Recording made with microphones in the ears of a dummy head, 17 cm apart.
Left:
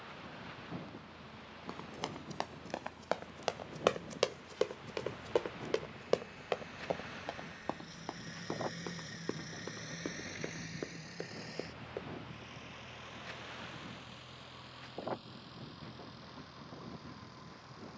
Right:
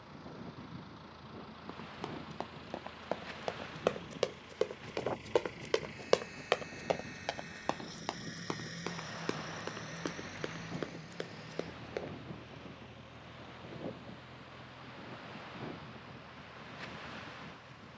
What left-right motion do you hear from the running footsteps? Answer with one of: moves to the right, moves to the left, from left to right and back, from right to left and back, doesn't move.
moves to the right.